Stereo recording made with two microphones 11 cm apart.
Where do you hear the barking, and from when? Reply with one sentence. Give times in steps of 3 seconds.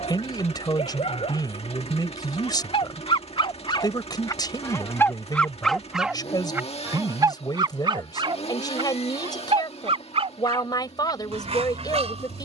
In this clip you hear the barking on the left from 0 s and on the right from 6 s.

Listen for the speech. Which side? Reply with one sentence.
You can hear the speech on the left.